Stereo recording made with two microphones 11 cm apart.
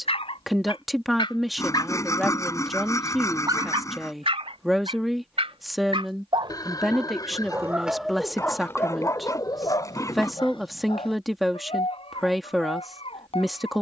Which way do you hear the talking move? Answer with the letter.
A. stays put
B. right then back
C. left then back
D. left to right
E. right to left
A.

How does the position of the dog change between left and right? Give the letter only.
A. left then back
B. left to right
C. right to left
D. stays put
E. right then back
E.